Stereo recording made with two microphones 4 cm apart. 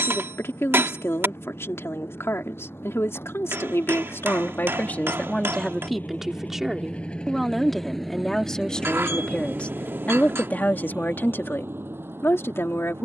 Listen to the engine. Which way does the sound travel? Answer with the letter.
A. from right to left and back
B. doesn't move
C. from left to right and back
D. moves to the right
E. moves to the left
D.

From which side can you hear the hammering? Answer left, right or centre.
right.